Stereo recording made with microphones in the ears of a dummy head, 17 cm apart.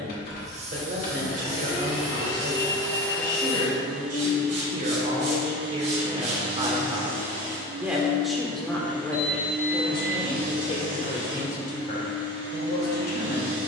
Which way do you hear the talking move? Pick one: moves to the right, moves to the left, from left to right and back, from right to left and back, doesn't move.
moves to the left.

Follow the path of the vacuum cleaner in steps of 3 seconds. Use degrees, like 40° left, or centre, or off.
40° left, 10° right, 40° right, 50° right, 60° right.